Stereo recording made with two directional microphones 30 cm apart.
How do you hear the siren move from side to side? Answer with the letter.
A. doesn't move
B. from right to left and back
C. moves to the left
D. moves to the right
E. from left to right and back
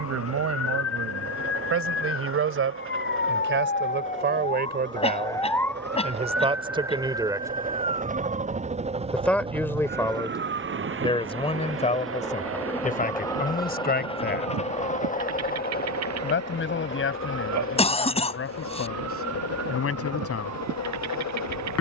D.